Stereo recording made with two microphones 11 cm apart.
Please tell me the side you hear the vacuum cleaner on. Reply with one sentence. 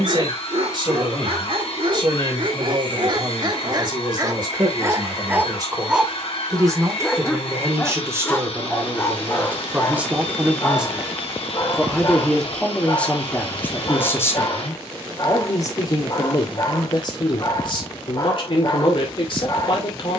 You can hear the vacuum cleaner on the left.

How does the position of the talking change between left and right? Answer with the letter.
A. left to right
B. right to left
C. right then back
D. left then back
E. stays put
B.